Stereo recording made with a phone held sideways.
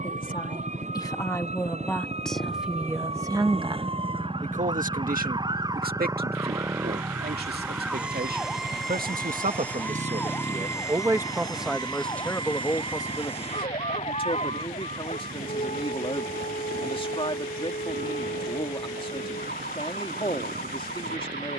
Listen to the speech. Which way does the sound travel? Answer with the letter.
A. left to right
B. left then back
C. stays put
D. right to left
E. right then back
E.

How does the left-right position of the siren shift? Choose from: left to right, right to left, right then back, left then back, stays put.
right to left.